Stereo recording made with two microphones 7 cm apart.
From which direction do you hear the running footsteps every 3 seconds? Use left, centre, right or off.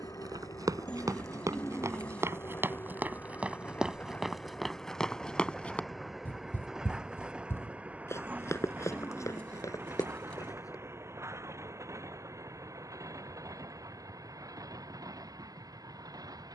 right, centre, left, left, off, off.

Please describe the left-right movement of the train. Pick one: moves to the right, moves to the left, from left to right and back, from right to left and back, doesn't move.
moves to the right.